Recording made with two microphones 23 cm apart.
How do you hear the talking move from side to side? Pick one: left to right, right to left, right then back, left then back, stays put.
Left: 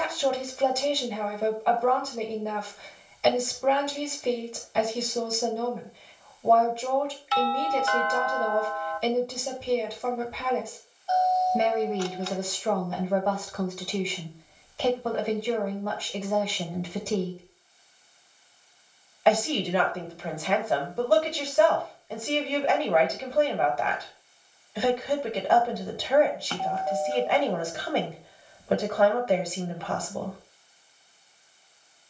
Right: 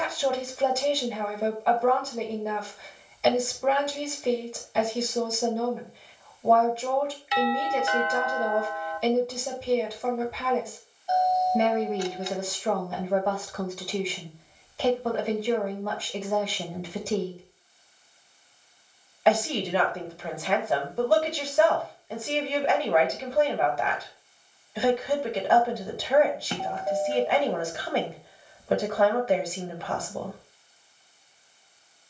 stays put.